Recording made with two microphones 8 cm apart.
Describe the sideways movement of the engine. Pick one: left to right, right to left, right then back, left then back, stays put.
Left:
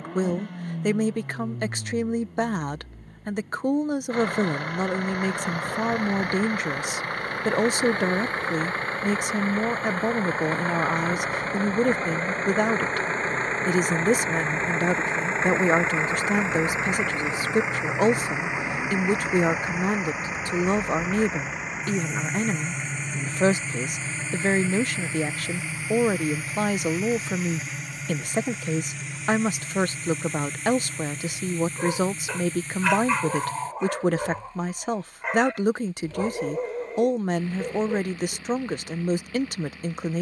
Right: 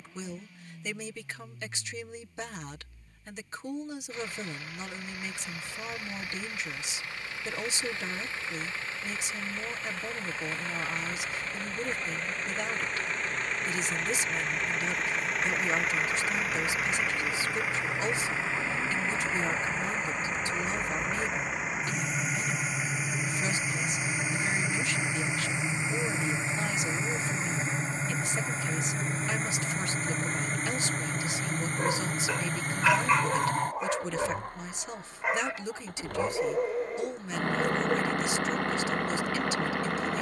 left to right.